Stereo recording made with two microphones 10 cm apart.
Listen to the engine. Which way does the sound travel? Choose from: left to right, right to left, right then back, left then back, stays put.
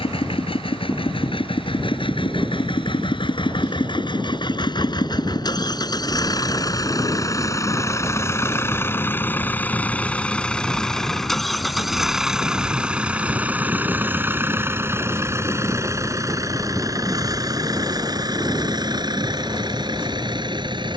left to right.